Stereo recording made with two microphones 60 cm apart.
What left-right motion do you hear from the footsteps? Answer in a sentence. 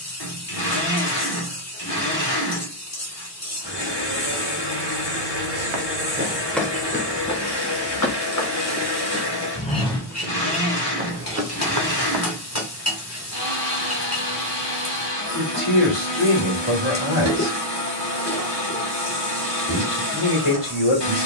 In this clip you hear the footsteps go left and come back.